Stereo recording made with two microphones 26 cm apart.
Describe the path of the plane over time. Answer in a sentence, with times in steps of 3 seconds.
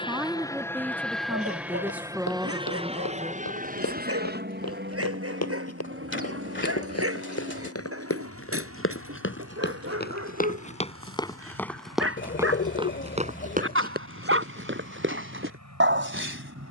You can hear the plane in the centre from 0 s and on the right from 3 s.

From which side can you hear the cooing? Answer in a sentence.
In this clip you hear the cooing on the left.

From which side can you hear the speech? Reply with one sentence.
You can hear the speech in the centre.